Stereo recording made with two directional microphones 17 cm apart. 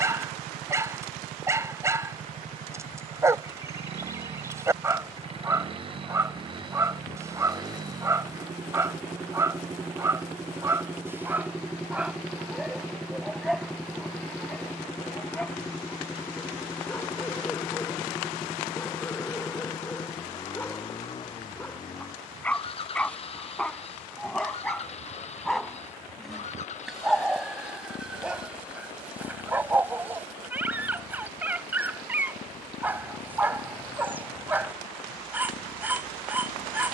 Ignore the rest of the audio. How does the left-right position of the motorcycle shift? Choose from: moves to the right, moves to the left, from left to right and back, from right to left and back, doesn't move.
moves to the left.